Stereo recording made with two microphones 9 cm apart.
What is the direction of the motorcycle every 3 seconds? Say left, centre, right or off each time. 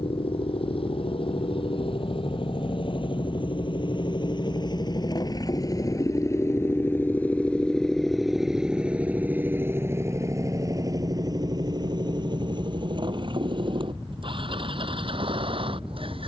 left, left, centre, right, right, right.